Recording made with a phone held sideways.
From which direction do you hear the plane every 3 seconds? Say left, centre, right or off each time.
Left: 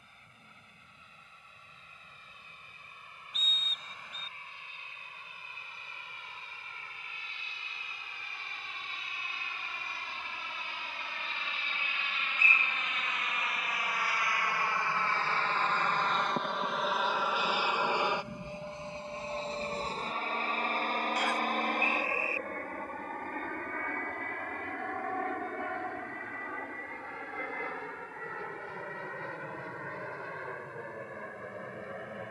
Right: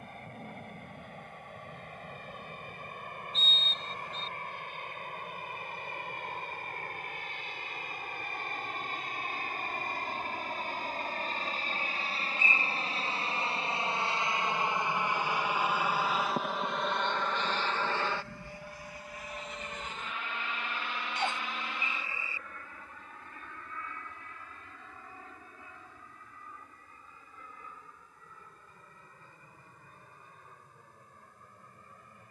right, right, right, right, right, centre, left, left, left, left, left.